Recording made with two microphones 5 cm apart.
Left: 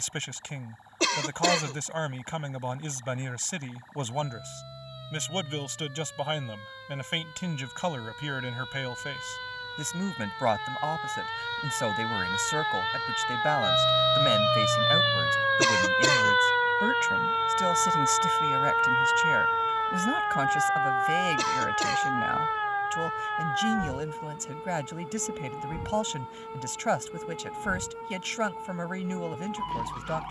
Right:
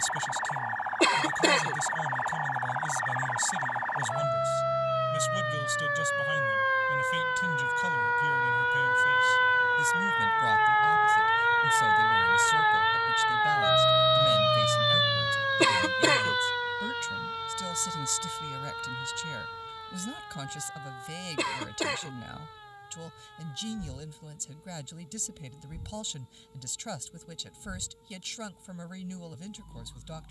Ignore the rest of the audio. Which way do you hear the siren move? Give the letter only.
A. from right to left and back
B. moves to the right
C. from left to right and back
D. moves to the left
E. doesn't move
D.